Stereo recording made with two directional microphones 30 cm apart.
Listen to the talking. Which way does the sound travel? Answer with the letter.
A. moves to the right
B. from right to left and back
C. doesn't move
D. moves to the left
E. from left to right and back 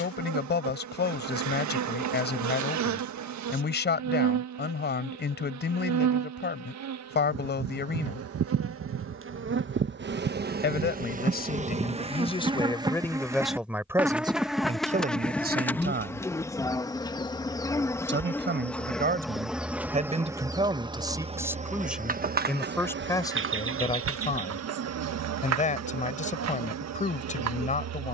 E.